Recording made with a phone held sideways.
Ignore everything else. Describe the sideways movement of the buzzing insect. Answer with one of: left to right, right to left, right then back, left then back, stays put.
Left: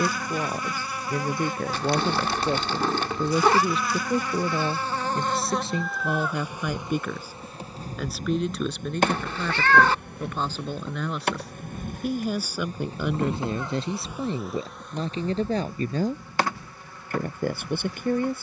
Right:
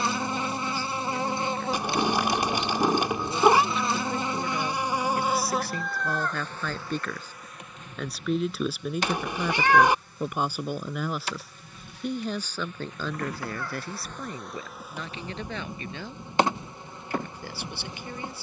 left then back.